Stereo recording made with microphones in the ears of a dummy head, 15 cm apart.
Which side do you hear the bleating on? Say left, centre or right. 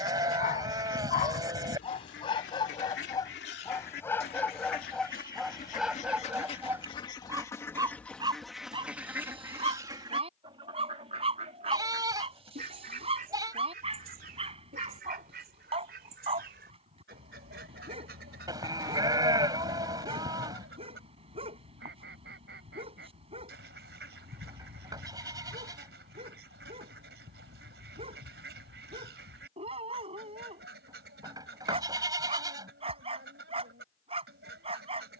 right.